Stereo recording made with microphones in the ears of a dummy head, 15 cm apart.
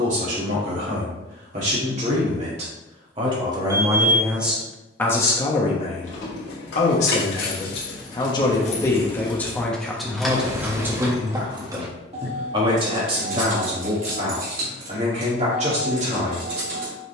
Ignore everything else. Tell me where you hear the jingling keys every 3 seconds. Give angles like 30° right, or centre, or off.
off, off, 60° left, centre, 50° right, 60° right.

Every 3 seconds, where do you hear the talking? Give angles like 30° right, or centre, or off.
40° right, centre, 30° left, 10° right, 40° right, 40° right.